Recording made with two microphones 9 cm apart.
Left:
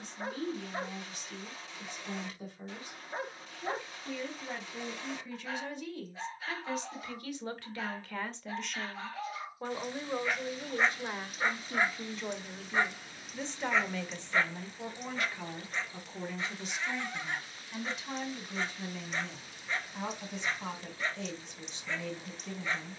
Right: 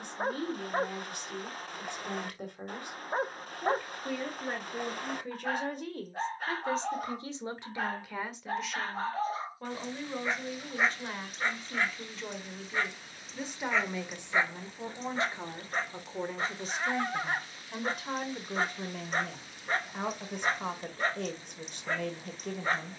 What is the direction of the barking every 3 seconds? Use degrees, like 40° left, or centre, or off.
50° right, 50° right, 50° right, 10° right, centre, 40° right, 40° right, 40° right.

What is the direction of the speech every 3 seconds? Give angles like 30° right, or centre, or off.
60° right, 60° right, 20° right, 10° left, 10° right, 40° right, 50° right, 60° right.